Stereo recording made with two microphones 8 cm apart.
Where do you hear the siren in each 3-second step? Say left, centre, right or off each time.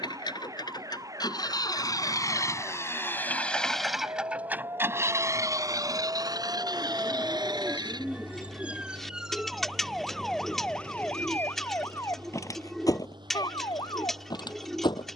right, right, right, centre, left.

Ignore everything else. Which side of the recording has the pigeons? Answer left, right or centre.
centre.